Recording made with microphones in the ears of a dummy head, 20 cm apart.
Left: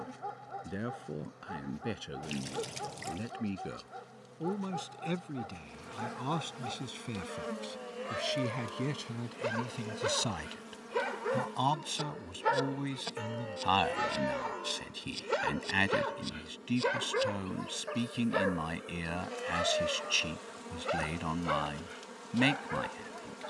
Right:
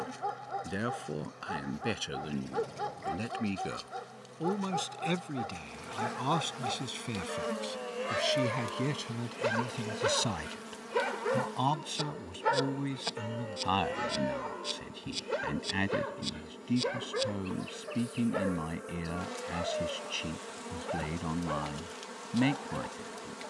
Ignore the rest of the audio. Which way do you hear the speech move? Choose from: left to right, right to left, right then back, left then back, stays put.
right to left.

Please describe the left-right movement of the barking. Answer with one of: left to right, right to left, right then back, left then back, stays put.
right to left.